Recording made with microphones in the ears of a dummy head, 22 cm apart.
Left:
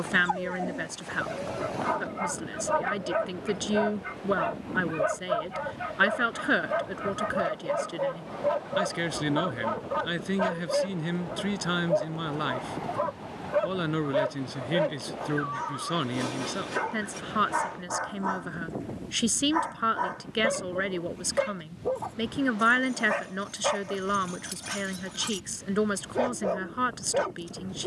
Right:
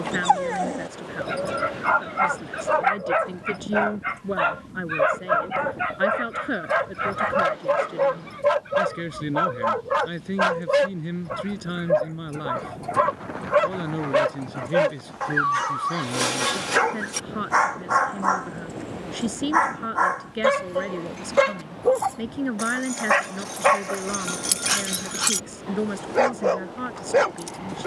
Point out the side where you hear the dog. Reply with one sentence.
You can hear the dog on the right.